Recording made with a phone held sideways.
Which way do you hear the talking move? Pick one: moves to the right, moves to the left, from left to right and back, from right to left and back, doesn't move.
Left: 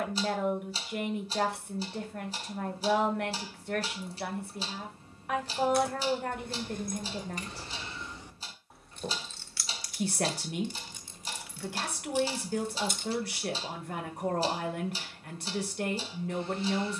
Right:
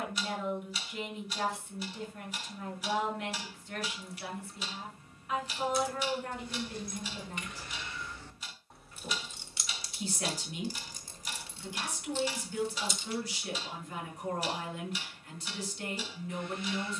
doesn't move.